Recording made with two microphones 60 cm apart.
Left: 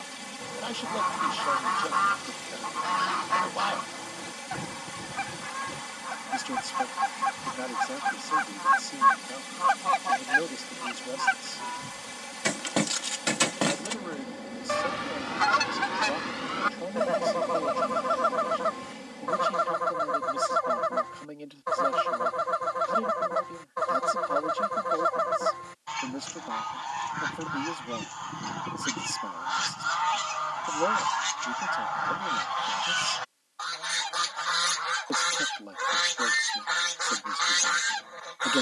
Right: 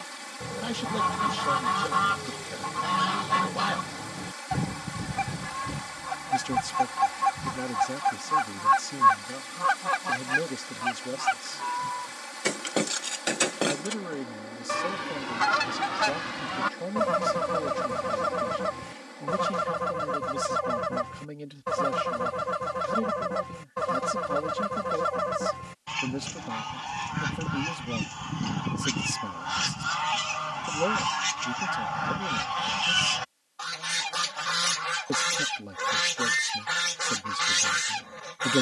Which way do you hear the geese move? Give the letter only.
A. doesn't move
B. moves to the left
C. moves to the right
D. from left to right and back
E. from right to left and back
E.